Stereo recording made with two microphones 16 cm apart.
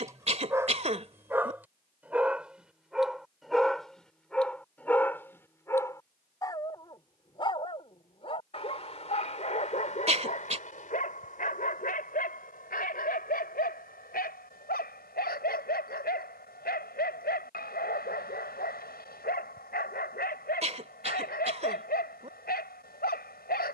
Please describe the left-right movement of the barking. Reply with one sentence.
You can hear the barking travel towards the left.